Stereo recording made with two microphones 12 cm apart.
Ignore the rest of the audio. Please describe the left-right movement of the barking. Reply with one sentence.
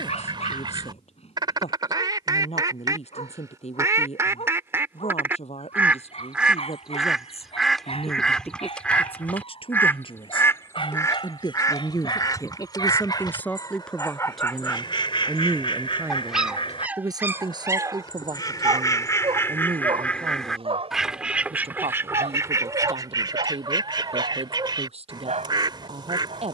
In this clip you hear the barking go from the left side to the right.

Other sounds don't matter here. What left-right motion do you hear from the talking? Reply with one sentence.
You can hear the talking travel towards the right.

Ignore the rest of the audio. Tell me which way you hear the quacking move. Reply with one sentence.
In this clip you hear the quacking go left and come back.